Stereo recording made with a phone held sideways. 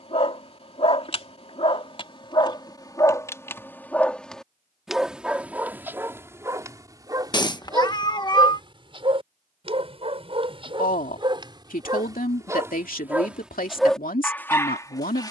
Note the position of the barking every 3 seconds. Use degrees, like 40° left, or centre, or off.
40° left, centre, 30° right, 40° right, centre.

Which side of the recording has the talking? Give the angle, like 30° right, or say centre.
70° left.